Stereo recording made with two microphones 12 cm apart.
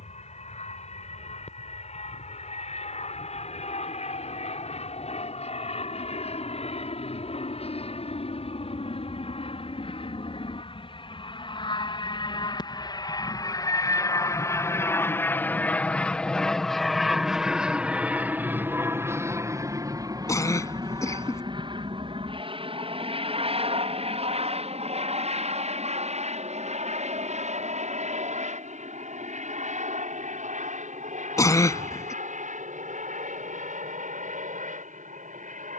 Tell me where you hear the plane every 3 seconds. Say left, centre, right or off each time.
left, left, left, left, left, centre, right, right, right, right, right, right.